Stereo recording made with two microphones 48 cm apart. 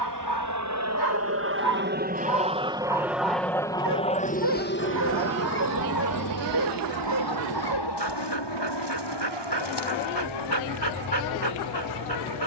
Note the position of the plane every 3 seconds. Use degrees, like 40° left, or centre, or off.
30° right, 20° left, 50° left, 60° left.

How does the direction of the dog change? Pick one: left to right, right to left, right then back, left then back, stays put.
stays put.